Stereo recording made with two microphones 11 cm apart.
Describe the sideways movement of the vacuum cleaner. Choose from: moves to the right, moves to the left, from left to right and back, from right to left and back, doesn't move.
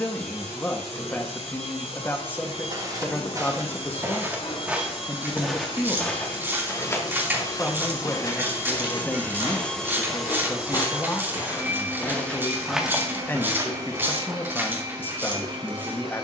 moves to the right.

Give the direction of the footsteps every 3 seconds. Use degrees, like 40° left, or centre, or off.
40° right, 20° right, 30° left, 40° left, 10° right, off.